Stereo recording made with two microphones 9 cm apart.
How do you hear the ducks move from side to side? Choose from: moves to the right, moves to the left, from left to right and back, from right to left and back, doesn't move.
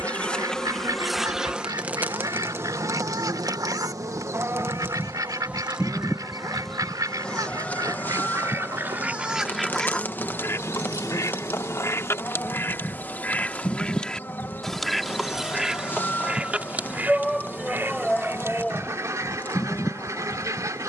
from right to left and back.